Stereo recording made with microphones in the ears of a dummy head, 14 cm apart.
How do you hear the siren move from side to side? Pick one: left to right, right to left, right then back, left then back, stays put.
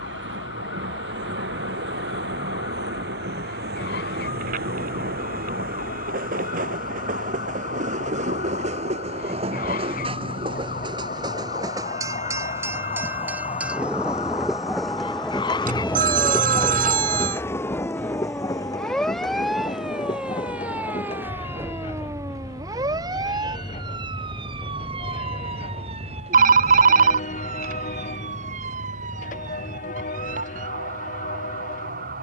left to right.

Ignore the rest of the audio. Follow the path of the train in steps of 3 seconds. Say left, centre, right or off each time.
right, right, right, right, centre, centre, left, left, left, left, left.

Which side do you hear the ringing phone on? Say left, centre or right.
right.